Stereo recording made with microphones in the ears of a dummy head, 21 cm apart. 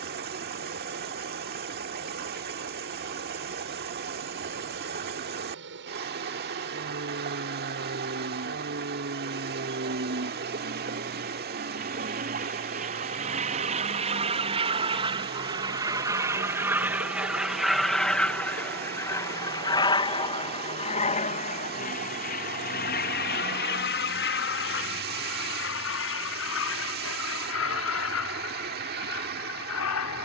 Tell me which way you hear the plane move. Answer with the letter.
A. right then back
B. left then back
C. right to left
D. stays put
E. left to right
C.